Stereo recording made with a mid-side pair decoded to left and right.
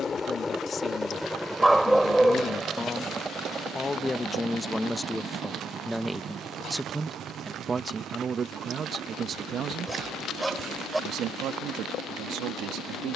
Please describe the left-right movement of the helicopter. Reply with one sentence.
In this clip you hear the helicopter travel towards the right.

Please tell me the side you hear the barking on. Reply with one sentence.
You can hear the barking in the centre.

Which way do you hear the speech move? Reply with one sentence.
In this clip you hear the speech move to the right.